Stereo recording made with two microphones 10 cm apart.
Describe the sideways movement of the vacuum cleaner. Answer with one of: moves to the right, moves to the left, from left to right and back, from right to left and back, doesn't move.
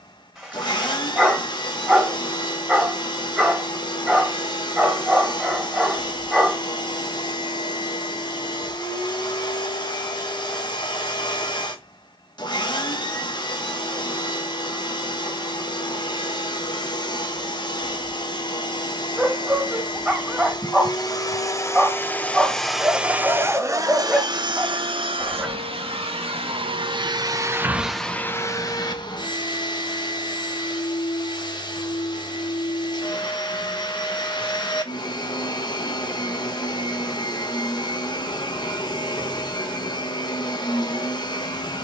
from left to right and back.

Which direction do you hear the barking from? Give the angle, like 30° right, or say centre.
10° right.